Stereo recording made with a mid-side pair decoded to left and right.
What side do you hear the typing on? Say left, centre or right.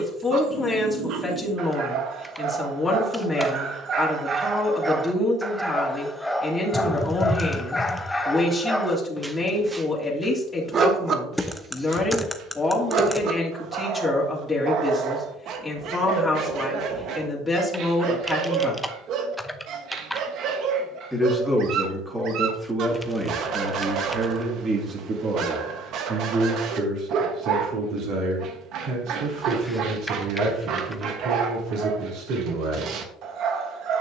centre.